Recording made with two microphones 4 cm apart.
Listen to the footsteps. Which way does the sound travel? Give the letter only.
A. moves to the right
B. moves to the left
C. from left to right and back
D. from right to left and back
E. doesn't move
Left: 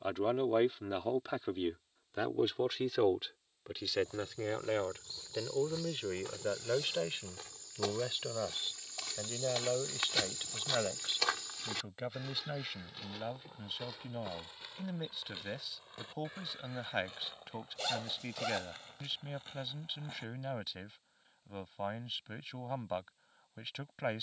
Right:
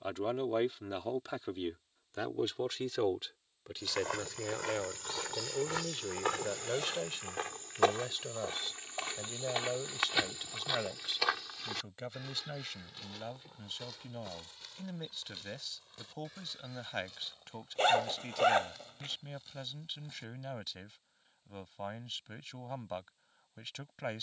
B.